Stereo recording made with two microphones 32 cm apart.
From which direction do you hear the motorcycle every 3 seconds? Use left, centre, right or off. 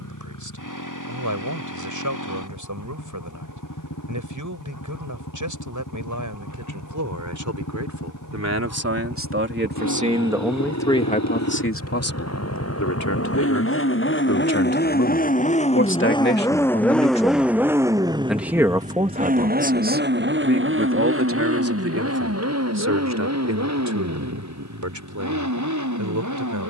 left, left, left, left, left, centre, right, right, right.